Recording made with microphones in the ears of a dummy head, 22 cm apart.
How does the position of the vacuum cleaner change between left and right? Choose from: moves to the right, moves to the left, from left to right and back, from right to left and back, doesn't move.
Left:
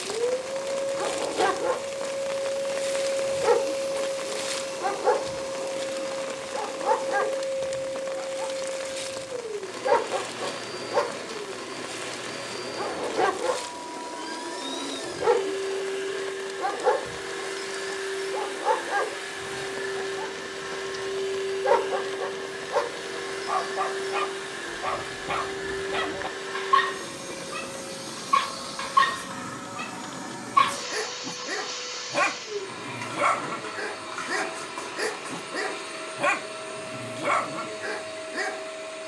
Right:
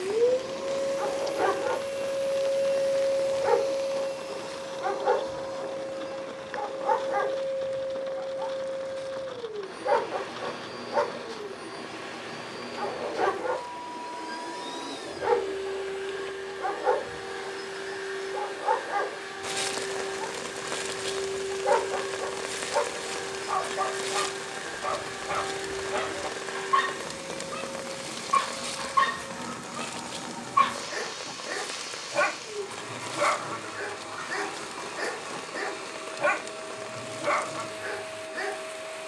moves to the left.